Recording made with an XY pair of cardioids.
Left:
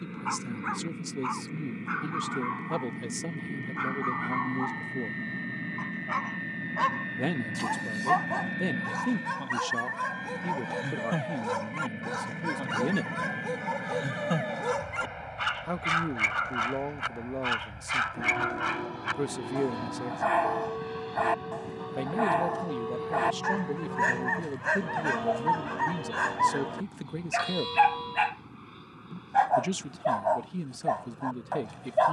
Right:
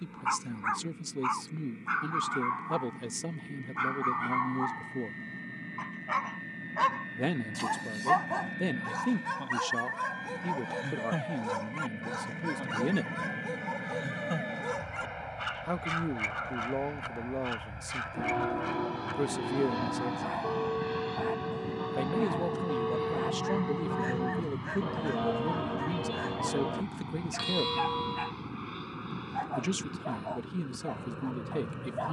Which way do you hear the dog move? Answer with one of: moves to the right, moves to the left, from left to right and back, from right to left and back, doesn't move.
moves to the left.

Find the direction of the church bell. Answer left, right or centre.
right.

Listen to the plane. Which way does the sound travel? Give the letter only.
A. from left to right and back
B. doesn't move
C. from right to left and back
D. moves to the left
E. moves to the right
E.